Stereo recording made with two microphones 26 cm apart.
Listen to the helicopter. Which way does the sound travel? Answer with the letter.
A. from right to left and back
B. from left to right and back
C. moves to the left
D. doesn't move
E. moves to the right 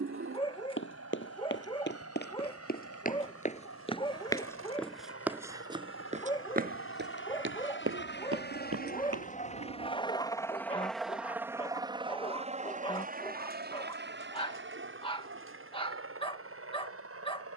E.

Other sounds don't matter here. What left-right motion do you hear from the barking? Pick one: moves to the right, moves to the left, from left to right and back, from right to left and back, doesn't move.
doesn't move.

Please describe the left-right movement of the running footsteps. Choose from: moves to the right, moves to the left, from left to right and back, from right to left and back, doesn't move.
moves to the right.